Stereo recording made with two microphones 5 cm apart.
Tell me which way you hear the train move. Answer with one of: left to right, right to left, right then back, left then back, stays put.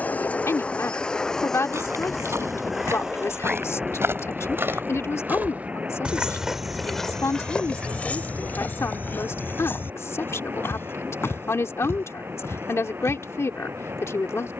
left to right.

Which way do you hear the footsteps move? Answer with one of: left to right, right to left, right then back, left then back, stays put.
right to left.